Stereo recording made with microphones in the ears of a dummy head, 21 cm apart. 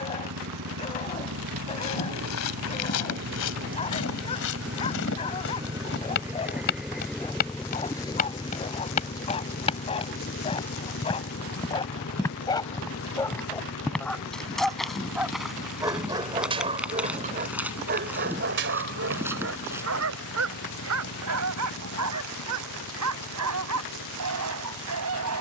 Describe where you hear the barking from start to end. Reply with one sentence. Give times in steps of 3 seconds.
In this clip you hear the barking on the left from 0 s, in the centre from 12 s and on the right from 15 s.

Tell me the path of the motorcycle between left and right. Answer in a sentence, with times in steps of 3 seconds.
You can hear the motorcycle on the right from 0 s, in the centre from 6 s and on the left from 9 s.